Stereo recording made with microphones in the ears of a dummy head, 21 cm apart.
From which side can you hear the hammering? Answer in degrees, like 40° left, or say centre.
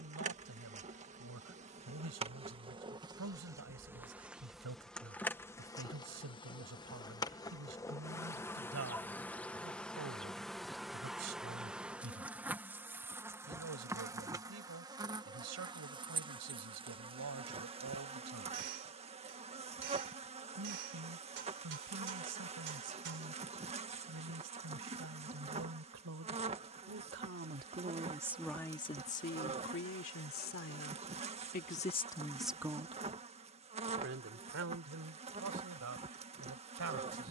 50° right.